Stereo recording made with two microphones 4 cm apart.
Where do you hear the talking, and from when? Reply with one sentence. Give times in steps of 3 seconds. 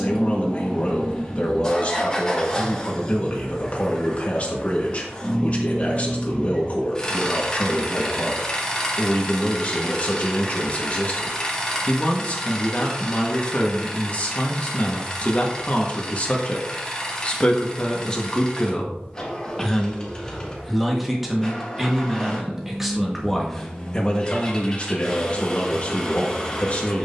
You can hear the talking on the left from 0 s, in the centre from 18 s and on the left from 24 s.